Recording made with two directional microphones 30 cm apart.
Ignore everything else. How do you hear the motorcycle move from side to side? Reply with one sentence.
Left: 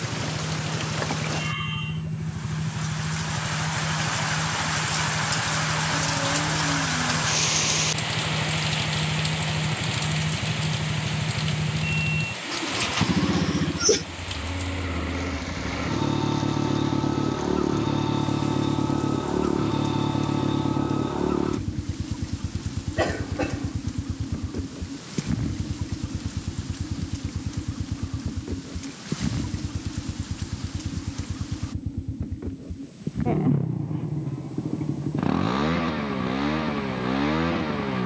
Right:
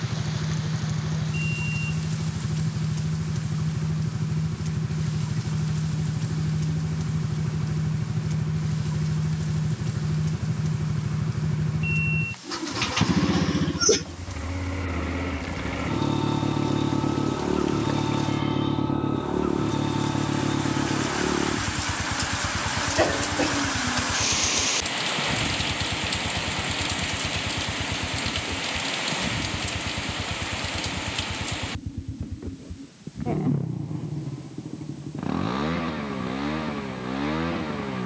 You can hear the motorcycle move to the left.